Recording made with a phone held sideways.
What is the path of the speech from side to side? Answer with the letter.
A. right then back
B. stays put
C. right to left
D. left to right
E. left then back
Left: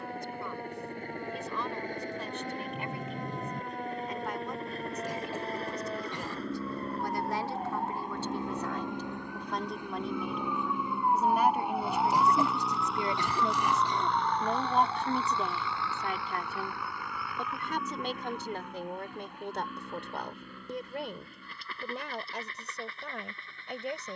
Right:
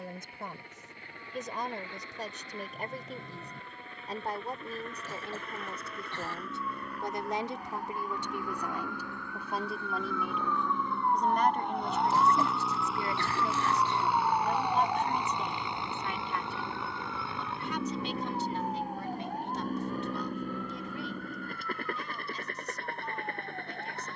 C.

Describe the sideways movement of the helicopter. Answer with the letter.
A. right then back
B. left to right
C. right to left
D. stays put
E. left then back
B.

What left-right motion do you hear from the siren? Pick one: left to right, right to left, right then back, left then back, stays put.
left to right.